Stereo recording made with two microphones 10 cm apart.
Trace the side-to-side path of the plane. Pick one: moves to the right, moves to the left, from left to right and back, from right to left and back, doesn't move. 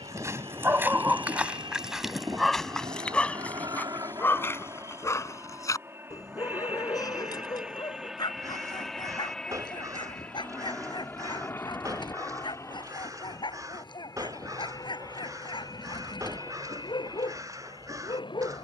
moves to the left.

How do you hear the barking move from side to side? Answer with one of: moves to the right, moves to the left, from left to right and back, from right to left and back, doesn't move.
moves to the left.